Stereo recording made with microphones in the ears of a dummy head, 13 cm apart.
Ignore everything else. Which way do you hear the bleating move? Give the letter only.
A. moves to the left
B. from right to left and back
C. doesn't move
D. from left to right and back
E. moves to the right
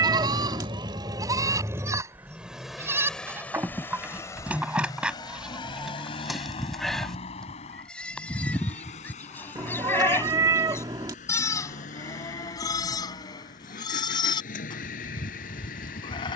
A.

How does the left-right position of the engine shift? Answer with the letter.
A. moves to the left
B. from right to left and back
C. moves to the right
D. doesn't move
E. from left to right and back
A.